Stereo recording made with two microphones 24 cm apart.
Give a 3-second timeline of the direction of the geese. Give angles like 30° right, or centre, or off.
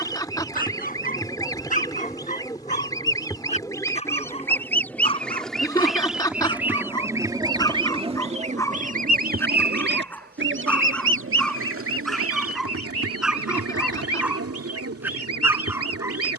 10° left, 10° left, 20° right, 50° right, 70° right, 70° right.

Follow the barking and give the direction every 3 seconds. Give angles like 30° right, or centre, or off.
30° left, 20° left, 10° left, 10° left, centre, 10° right.